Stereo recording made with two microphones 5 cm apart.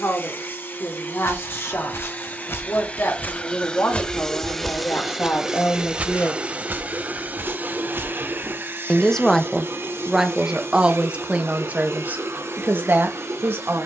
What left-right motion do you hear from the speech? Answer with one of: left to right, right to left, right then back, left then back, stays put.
left to right.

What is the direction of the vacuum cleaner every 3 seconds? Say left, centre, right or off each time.
left, centre, right, right, right.